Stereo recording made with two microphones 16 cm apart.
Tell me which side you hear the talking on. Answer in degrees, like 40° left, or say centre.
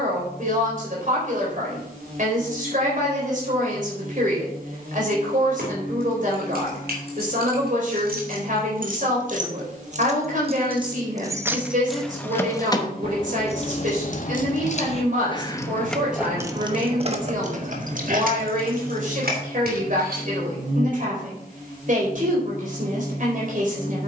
50° right.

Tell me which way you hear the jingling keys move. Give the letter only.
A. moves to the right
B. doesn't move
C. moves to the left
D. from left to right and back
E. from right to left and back
E.